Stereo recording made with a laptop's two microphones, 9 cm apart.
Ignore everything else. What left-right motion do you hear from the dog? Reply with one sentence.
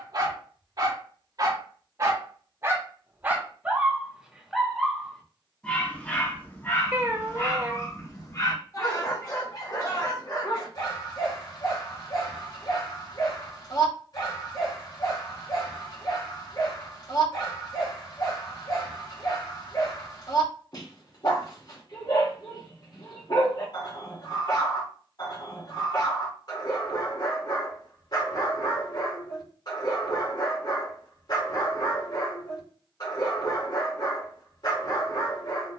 You can hear the dog move from right to left.